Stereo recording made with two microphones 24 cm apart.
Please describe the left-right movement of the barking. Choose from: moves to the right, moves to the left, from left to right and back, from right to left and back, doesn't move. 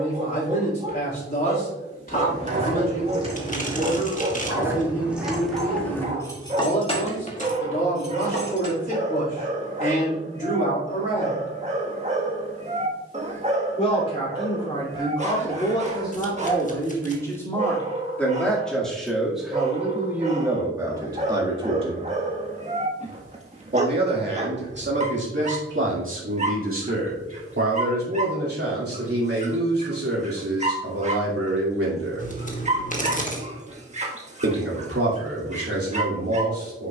doesn't move.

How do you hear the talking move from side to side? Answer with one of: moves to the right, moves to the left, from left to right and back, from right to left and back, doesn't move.
moves to the right.